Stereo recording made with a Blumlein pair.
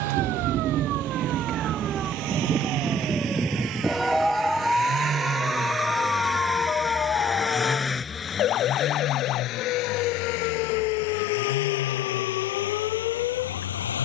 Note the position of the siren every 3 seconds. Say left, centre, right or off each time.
right, centre, left, left, left.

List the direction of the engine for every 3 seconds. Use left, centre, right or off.
right, right, centre, left, left.